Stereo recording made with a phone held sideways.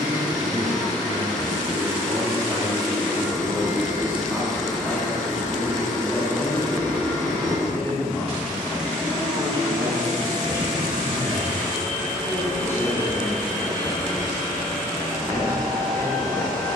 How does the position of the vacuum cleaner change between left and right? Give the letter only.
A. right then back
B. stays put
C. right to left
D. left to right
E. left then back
B.